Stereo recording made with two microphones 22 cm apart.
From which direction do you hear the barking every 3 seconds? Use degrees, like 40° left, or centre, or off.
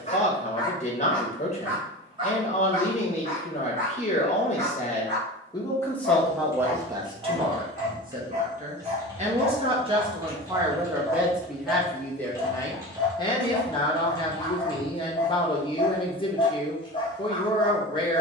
centre, 50° right, 40° right, 20° right, 10° left, 20° left.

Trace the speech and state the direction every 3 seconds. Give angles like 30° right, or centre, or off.
30° left, 30° left, 20° right, 10° right, 20° left, 20° left.